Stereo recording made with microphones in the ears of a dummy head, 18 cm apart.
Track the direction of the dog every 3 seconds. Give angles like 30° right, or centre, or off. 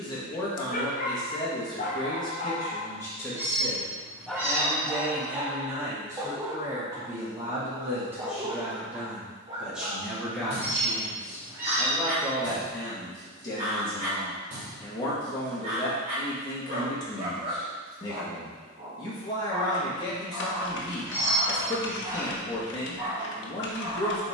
40° left, centre, 20° right, 30° right, 40° right, 40° right, 40° right, 40° right.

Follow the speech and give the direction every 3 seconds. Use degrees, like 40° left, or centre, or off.
20° left, centre, 10° right, centre, 20° left, 20° left, 20° left, 20° left.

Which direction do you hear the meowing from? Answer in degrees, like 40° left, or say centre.
10° right.